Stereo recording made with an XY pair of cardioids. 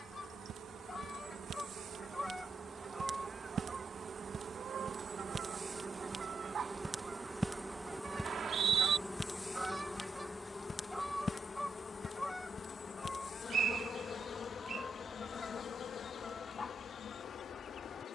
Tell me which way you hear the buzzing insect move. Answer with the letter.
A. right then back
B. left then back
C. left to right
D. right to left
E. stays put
D.